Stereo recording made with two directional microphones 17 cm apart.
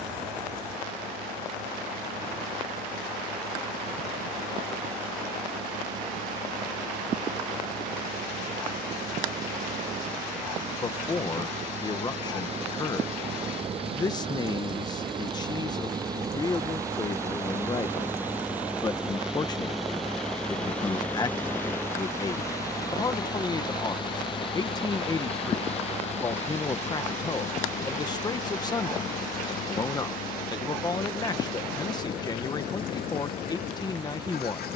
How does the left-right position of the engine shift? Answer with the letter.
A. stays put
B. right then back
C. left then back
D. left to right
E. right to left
E.